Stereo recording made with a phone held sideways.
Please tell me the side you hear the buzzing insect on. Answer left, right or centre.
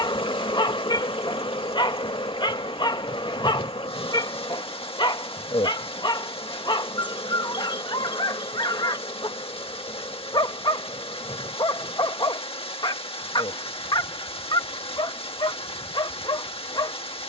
left.